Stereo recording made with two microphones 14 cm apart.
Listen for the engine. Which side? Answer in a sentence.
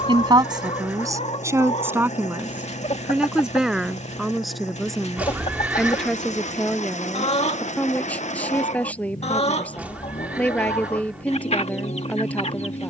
You can hear the engine on the left.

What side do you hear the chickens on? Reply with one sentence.
You can hear the chickens on the left.